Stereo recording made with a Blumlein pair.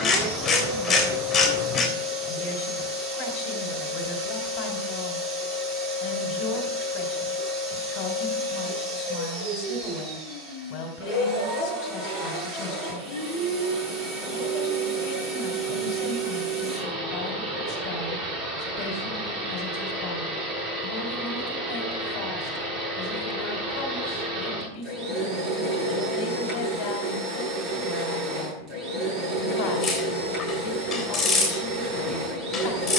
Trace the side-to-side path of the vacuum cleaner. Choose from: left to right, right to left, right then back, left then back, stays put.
stays put.